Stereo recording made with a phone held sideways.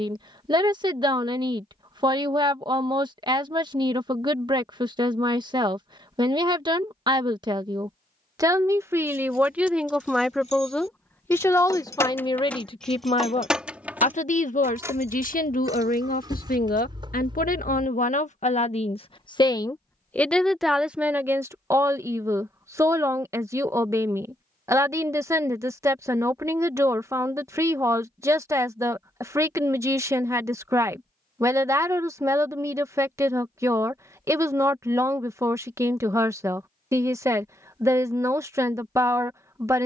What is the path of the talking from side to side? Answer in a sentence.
You can hear the talking go left and come back.